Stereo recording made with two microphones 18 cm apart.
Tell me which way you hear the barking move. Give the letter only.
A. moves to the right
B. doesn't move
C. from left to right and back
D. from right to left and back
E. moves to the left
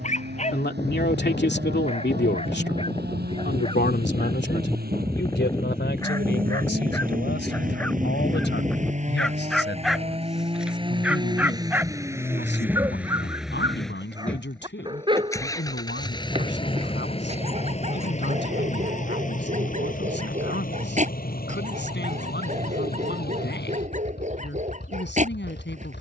A.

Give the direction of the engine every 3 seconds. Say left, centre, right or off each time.
right, right, right, right, centre, left, left, left, left.